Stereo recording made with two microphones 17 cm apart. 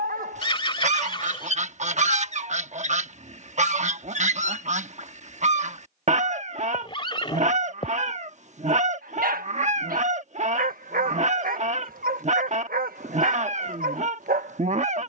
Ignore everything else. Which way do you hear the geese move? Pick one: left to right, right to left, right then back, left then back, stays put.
stays put.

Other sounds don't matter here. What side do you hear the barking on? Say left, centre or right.
right.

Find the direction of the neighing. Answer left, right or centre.
left.